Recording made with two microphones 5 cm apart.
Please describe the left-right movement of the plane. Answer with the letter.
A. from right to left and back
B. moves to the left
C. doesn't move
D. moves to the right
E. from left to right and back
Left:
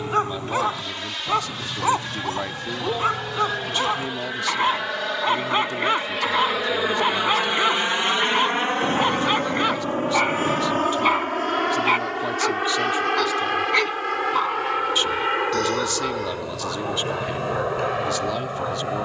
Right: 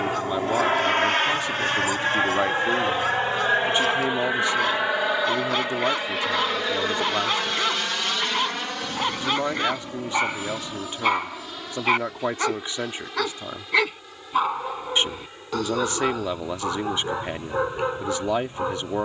B.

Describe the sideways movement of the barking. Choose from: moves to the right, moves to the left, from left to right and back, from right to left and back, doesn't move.
moves to the right.